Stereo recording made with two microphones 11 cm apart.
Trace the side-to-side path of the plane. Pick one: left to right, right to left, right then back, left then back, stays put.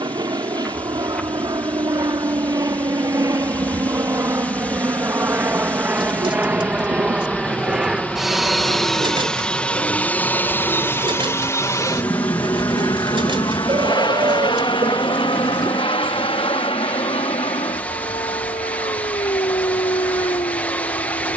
right to left.